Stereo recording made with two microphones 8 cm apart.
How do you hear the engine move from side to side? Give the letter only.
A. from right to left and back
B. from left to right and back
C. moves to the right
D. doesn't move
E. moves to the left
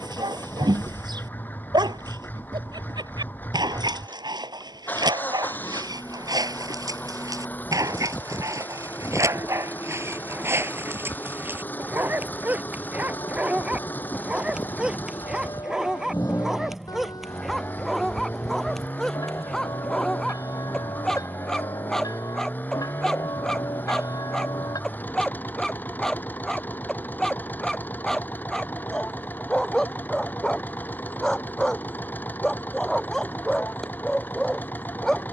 D.